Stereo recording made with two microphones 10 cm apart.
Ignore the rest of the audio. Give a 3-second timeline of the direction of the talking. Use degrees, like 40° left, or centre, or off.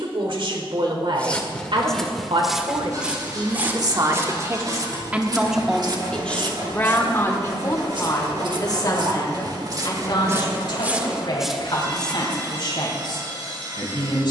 60° right, 30° right, 30° left, 50° left, 60° left.